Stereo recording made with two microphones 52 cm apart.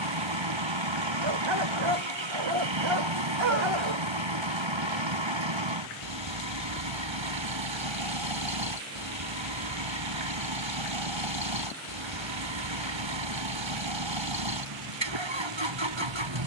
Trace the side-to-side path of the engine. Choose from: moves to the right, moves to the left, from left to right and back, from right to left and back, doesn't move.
doesn't move.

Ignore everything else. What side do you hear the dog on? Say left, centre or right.
right.